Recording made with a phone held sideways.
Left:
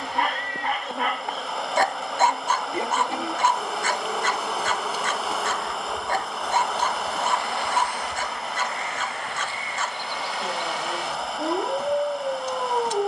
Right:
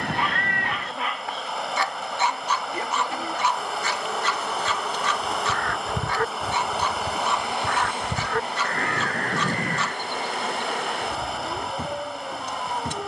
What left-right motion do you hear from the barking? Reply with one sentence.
You can hear the barking stay in one place.